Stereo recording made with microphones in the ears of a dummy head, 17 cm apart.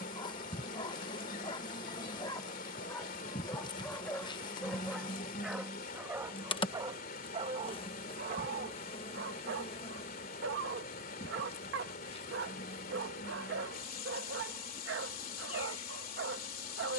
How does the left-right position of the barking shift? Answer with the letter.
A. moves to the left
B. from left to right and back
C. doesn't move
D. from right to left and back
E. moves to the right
E.